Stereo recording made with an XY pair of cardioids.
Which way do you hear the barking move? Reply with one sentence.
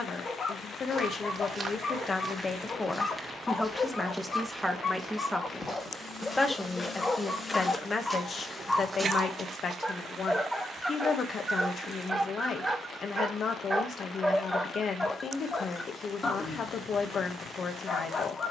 You can hear the barking go right and come back.